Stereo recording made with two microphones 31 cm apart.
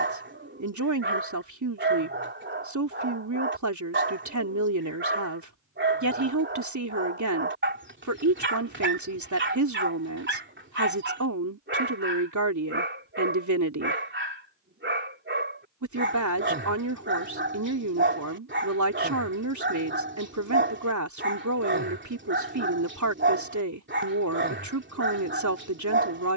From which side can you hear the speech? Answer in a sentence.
You can hear the speech on the right.